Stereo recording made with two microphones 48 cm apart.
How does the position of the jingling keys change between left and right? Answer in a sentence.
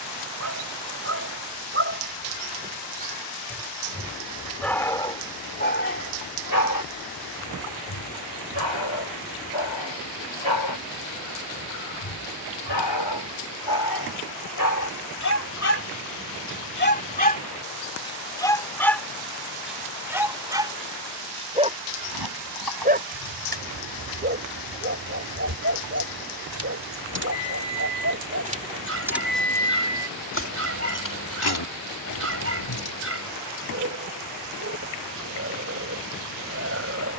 In this clip you hear the jingling keys travel towards the left.